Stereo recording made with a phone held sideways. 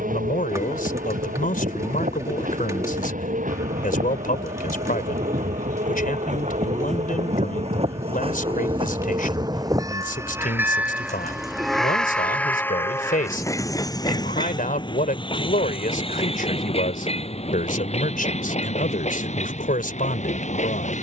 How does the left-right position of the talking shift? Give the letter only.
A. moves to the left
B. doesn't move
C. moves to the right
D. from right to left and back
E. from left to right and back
B.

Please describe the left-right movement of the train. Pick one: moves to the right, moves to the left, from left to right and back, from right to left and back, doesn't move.
moves to the left.